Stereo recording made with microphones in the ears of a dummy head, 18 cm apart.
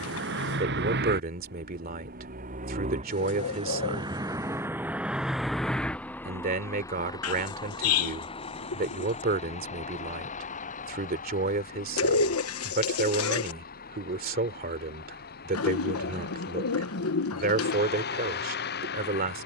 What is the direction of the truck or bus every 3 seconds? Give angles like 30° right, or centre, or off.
60° right, 20° right, 20° left, 40° left, 50° left, 50° left, 60° left.